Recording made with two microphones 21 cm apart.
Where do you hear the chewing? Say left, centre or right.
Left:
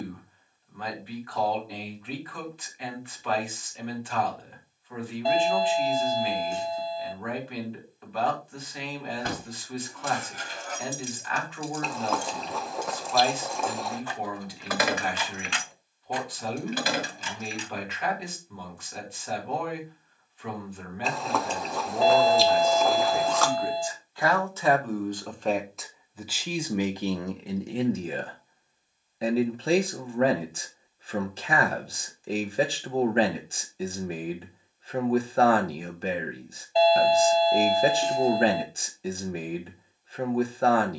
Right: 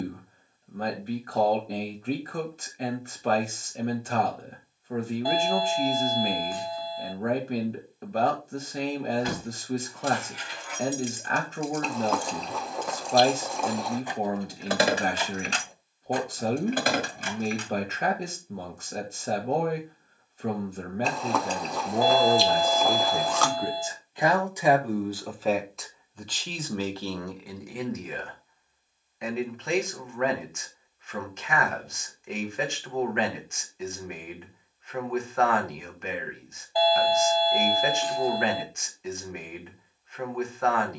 centre.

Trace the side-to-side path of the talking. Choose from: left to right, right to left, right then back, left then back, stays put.
right to left.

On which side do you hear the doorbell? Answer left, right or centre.
left.